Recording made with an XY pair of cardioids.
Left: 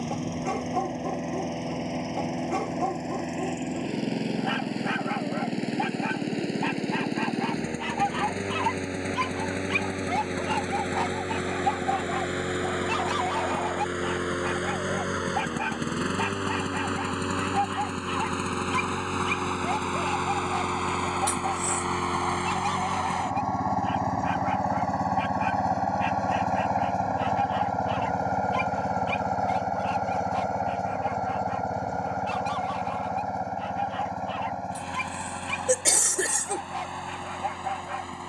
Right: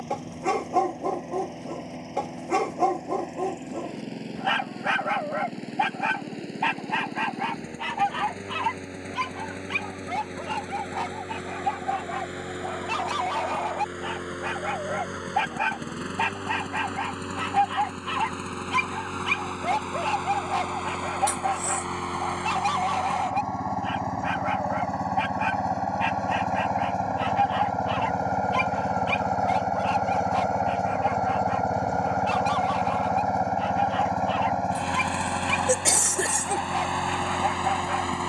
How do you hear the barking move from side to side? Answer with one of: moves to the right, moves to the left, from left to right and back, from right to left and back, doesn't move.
from right to left and back.